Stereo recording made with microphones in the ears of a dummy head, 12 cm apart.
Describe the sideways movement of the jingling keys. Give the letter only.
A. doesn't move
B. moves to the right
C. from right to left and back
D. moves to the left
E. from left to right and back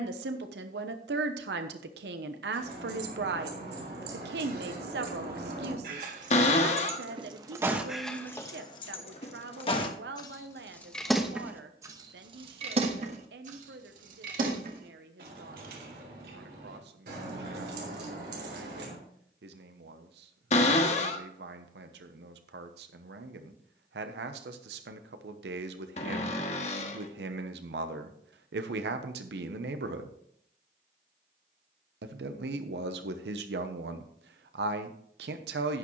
C.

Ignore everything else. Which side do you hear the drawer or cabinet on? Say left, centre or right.
left.